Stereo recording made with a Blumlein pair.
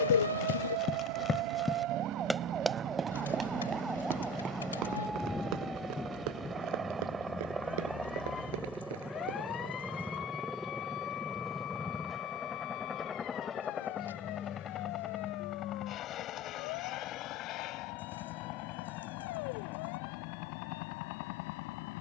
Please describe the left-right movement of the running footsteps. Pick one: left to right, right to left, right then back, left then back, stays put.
left to right.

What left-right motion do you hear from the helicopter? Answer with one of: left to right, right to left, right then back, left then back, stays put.
right to left.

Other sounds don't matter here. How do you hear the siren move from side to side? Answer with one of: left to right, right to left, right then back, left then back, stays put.
right to left.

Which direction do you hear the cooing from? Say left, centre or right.
left.